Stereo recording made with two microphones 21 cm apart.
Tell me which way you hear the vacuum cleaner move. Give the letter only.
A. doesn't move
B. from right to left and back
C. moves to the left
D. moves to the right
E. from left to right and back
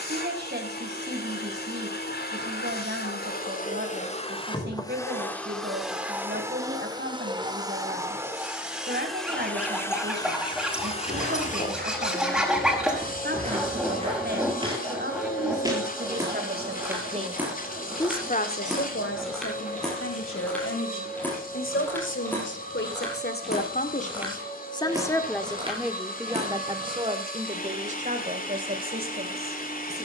E.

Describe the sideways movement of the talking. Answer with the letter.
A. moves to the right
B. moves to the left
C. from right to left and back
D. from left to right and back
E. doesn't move
C.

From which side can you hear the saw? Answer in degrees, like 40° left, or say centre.
centre.